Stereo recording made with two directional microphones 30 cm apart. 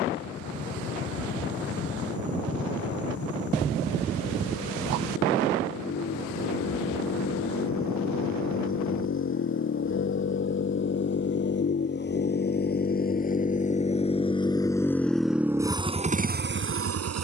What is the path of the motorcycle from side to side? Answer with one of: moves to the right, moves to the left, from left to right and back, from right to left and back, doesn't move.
moves to the right.